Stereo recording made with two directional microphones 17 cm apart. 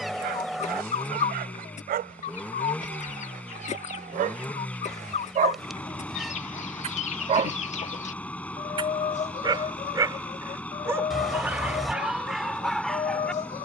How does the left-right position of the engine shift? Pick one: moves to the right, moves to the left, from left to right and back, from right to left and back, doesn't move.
doesn't move.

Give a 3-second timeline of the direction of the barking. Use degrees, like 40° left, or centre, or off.
60° right, 50° right, 40° right, 10° right, centre.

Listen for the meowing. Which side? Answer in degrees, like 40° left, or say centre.
centre.